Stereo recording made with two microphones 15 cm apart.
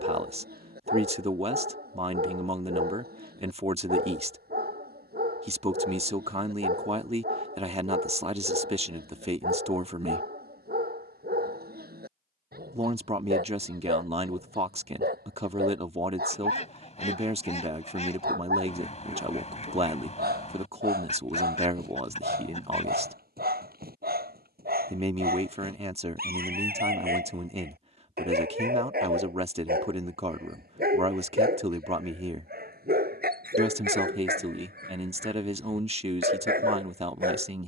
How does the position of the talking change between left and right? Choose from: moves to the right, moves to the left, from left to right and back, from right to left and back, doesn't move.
doesn't move.